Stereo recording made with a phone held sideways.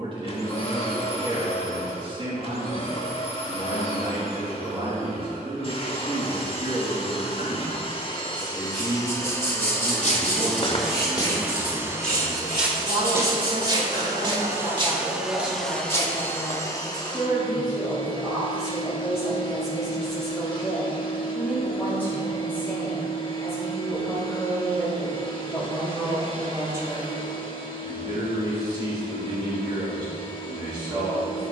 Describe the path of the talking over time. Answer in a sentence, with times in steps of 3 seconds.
In this clip you hear the talking on the right from 0 s, in the centre from 18 s and on the right from 27 s.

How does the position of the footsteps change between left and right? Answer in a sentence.
In this clip you hear the footsteps go right and come back.